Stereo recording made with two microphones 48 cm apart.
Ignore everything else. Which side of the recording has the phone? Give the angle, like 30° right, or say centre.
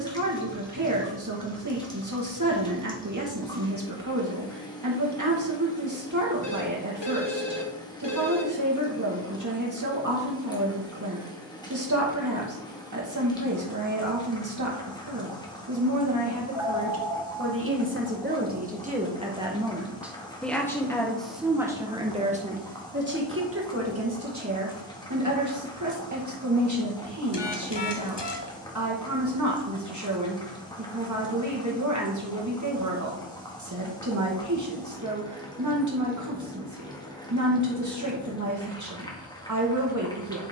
60° left.